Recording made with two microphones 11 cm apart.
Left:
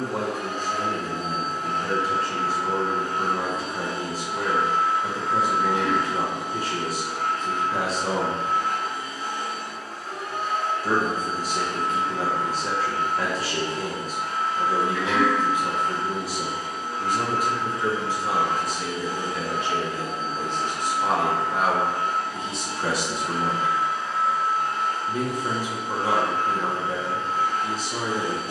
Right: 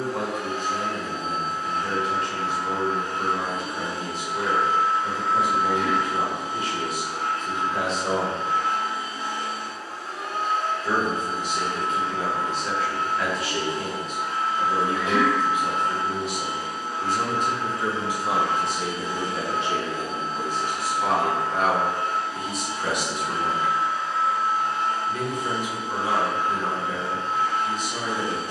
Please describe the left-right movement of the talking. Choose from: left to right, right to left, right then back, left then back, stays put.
right then back.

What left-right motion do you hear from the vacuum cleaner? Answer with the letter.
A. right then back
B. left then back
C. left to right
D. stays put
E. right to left
C.